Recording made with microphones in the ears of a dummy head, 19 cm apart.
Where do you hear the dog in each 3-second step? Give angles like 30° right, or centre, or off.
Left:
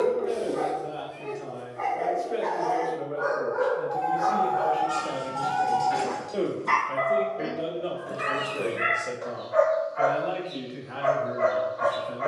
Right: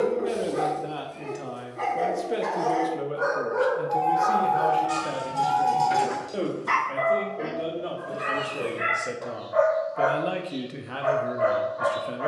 50° right, 30° right, 10° left, 30° left.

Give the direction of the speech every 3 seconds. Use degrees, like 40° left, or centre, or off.
60° right, 20° right, centre, 50° right.